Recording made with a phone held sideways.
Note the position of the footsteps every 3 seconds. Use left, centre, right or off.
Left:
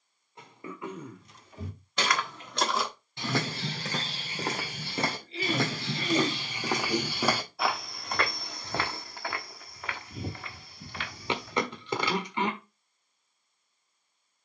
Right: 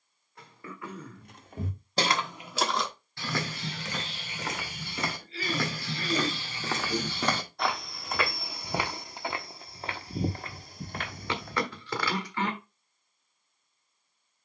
right, left, centre, right, off.